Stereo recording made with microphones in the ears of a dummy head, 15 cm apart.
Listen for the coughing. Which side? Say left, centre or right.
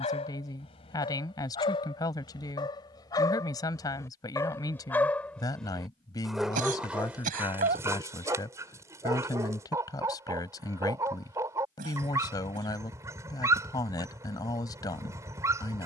right.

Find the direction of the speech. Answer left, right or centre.
left.